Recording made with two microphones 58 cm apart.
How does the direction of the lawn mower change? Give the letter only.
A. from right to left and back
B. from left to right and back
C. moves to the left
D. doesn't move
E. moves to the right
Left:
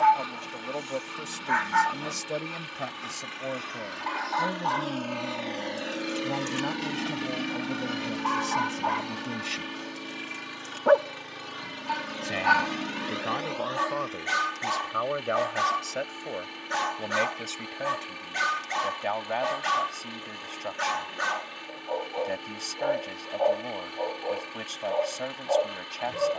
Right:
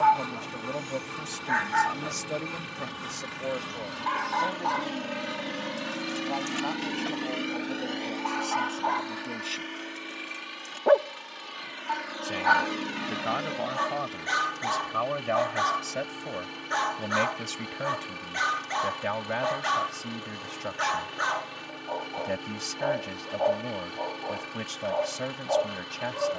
A.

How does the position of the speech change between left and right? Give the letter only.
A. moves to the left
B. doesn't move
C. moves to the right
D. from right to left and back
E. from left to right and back
D.